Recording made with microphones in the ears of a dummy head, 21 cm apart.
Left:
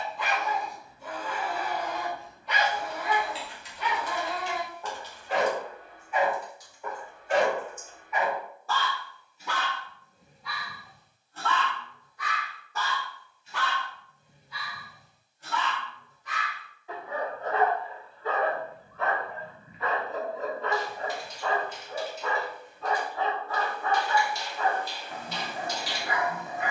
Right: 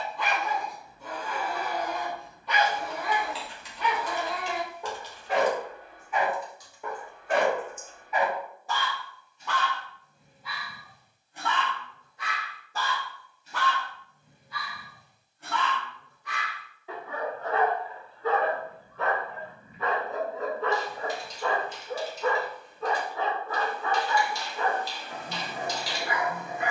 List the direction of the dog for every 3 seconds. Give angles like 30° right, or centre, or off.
70° right, 70° right, 40° right, centre, 40° right, 50° right, 60° right, 70° right, 70° right.